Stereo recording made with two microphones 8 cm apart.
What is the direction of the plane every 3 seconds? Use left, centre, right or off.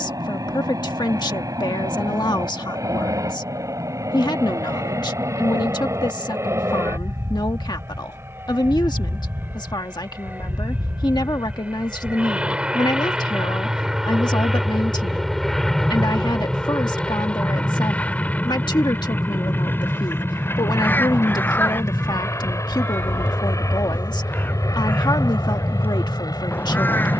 right, right, right, right, centre, centre, left, left, left.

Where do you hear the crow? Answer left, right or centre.
left.